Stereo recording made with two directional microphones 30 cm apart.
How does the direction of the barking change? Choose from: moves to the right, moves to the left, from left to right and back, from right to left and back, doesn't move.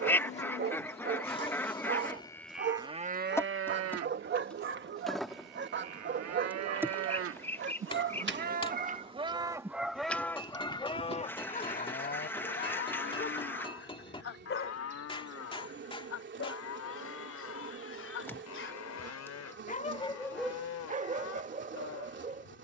from right to left and back.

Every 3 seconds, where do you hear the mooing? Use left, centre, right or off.
left, right, right, centre, left, left, left, left.